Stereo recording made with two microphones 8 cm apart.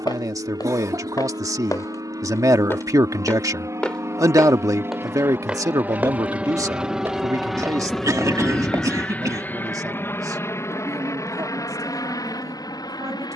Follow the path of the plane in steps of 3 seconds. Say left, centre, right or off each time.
right, right, centre, left, left.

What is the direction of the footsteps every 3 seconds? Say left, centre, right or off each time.
left, centre, right, off, off.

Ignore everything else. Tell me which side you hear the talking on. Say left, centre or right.
right.